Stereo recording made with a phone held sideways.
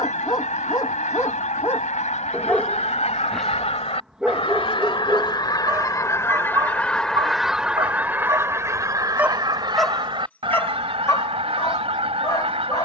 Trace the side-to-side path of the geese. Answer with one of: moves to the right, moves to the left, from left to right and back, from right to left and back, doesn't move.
moves to the right.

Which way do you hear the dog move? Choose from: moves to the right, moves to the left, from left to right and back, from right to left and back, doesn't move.
from left to right and back.